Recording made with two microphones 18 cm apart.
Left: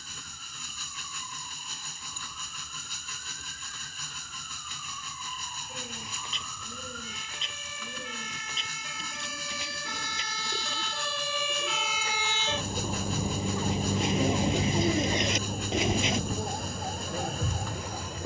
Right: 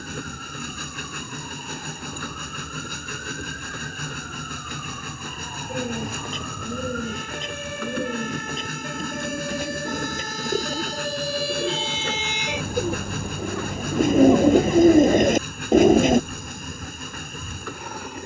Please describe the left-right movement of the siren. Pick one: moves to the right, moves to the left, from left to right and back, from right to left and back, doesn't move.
moves to the left.